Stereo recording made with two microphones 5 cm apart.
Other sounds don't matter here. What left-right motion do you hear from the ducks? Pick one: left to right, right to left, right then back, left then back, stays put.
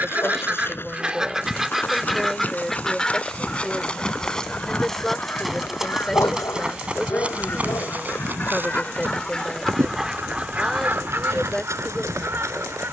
left then back.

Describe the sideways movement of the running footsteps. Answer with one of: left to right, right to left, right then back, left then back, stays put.
left to right.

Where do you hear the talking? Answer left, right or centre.
centre.